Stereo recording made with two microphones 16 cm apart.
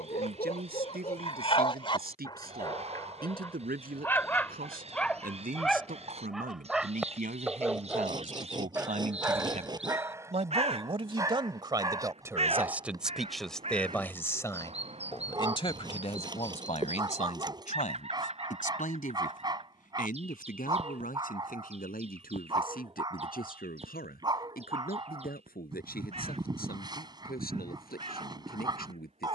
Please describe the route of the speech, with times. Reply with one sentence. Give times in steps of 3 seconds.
You can hear the speech on the right from 0 s, in the centre from 12 s and on the left from 15 s.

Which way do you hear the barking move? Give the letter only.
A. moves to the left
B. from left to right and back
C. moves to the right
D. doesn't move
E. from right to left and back
C.